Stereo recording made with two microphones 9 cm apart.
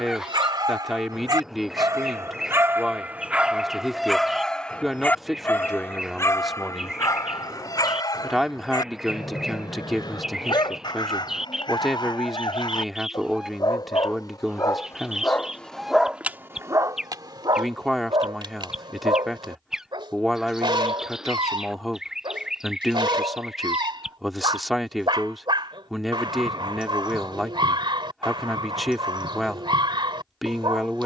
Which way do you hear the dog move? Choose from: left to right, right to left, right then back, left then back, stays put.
left then back.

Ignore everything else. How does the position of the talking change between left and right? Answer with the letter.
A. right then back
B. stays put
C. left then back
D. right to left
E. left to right
B.